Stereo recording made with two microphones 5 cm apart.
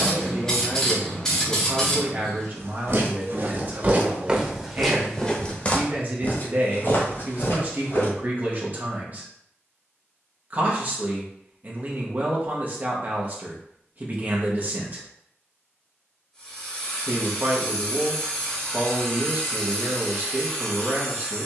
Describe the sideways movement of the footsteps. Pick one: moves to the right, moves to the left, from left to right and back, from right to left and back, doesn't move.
moves to the left.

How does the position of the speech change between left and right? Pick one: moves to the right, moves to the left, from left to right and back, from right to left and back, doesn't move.
doesn't move.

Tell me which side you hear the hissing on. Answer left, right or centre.
centre.